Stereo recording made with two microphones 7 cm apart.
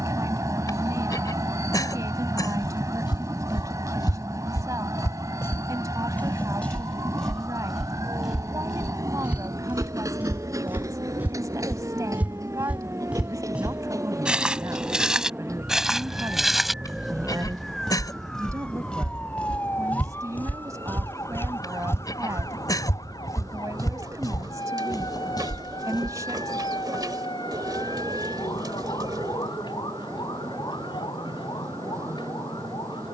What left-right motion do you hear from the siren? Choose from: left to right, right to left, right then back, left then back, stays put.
right to left.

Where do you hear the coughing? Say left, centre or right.
left.